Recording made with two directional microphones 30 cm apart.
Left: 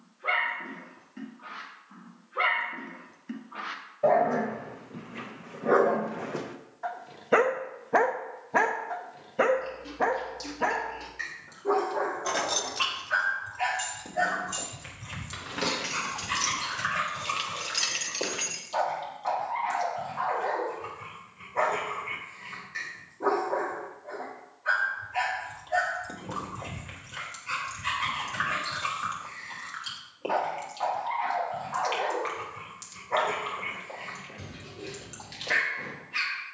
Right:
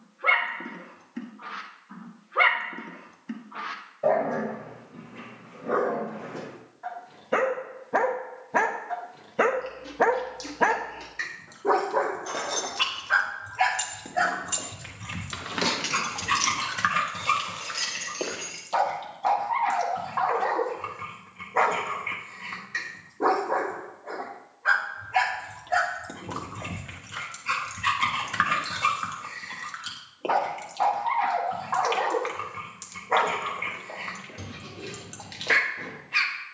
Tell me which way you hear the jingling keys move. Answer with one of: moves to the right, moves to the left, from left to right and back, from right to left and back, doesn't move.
from left to right and back.